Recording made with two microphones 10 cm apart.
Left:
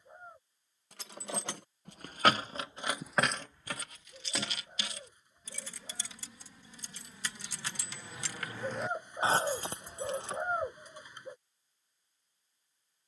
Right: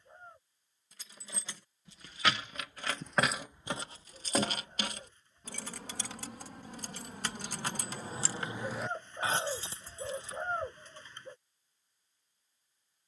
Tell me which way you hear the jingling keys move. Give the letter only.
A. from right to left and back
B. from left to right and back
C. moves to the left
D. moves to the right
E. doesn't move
B.